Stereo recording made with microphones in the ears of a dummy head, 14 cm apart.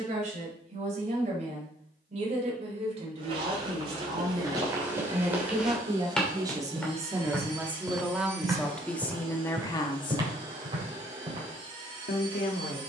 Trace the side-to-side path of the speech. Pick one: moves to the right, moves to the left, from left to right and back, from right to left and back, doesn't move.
moves to the left.